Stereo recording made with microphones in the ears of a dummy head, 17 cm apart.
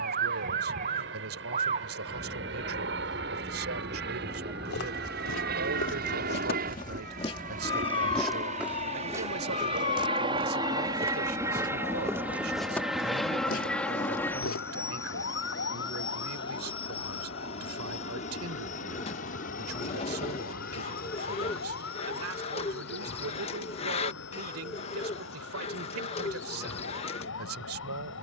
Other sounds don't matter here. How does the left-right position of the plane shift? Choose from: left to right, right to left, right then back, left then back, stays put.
right to left.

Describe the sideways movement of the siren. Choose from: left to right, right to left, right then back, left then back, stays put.
right to left.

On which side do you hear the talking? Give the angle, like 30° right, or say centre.
80° right.